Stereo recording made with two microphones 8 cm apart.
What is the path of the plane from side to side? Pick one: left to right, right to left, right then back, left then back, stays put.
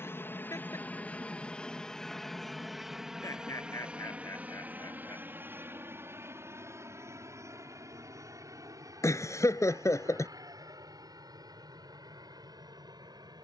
left to right.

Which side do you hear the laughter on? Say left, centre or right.
left.